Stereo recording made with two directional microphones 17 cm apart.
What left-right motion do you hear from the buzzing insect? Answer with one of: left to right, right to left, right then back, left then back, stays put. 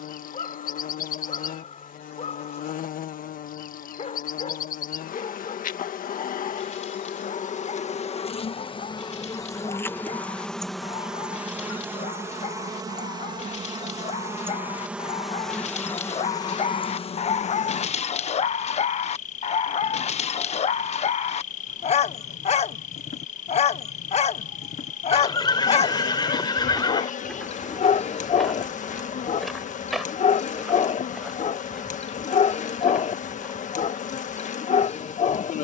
right then back.